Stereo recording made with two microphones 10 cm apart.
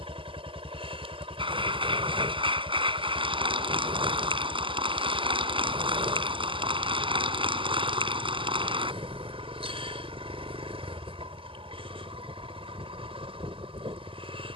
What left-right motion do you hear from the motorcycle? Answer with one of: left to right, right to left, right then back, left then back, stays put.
stays put.